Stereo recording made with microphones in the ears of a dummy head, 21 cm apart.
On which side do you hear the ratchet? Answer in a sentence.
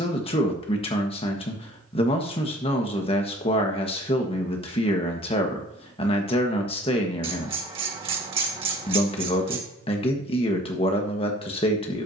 In this clip you hear the ratchet on the right.